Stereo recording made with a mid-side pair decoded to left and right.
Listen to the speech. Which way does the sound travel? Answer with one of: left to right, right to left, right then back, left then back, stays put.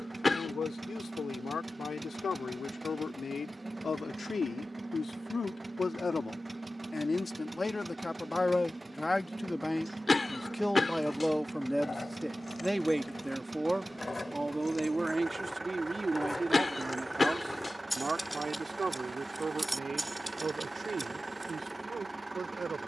left to right.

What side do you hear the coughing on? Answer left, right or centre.
left.